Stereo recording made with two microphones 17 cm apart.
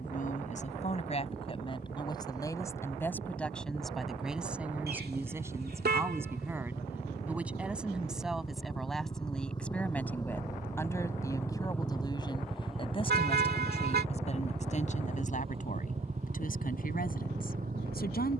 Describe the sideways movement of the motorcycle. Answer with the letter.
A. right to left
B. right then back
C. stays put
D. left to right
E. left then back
D.